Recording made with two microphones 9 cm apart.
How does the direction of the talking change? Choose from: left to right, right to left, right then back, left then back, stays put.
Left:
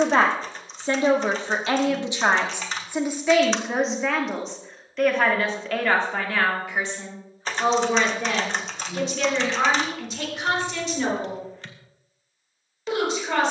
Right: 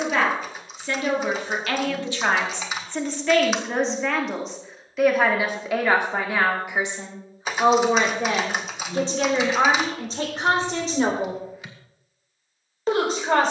left to right.